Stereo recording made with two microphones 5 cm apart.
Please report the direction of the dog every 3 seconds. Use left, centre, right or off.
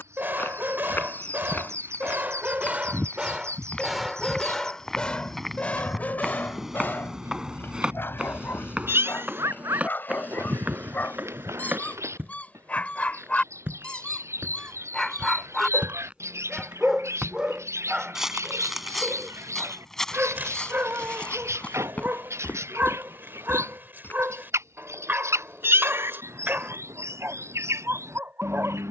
right, centre, left, left, left, centre, right, right, right, right.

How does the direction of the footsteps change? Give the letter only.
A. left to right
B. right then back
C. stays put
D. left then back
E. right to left
B.